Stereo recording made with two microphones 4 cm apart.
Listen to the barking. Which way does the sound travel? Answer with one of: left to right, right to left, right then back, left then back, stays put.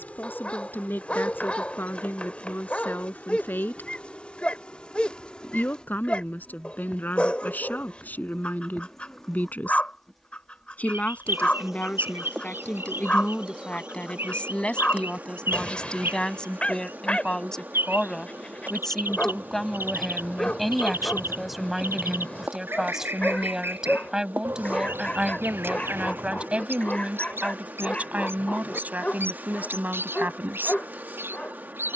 stays put.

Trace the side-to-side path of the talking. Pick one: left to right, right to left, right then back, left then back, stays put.
left to right.